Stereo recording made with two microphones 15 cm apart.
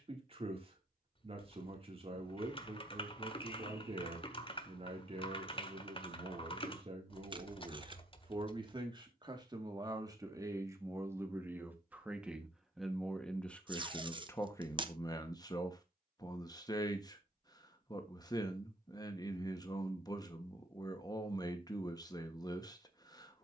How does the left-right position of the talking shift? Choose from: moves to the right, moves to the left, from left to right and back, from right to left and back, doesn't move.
moves to the left.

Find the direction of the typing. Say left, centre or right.
left.